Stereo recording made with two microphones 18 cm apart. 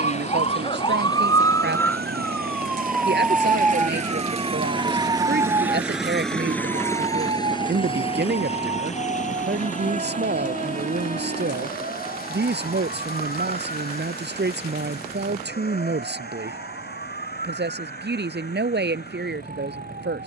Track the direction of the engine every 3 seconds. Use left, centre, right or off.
right, right, left, left, left, left, left.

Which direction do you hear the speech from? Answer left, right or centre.
right.